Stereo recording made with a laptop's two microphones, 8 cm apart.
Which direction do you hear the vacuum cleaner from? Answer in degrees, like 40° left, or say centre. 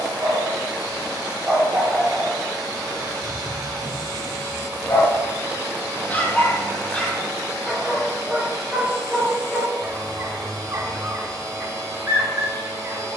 50° right.